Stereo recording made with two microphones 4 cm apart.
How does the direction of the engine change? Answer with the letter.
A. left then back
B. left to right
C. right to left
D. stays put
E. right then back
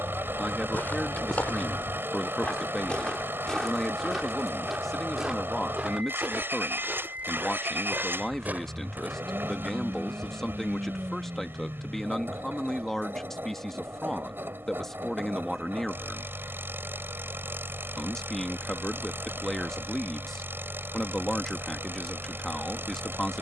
D.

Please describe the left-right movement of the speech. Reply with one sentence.
In this clip you hear the speech stay put.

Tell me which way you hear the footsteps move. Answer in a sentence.
You can hear the footsteps travel towards the right.